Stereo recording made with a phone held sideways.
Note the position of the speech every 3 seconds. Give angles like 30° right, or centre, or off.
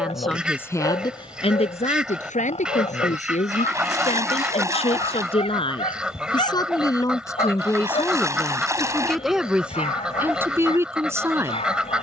30° left, 40° left, 20° left, 10° right.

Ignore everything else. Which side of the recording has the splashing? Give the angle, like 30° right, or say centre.
20° right.